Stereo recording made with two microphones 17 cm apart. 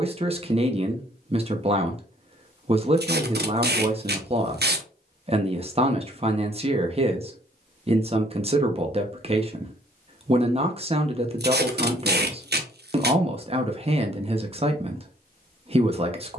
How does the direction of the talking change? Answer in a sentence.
In this clip you hear the talking stay put.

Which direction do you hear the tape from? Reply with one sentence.
You can hear the tape on the right.